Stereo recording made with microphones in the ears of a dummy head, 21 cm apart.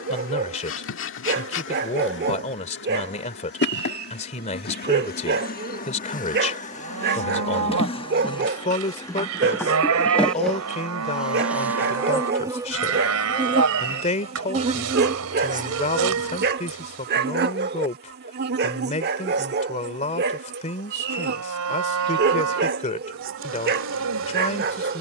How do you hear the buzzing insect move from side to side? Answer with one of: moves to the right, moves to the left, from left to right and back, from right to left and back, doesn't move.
moves to the right.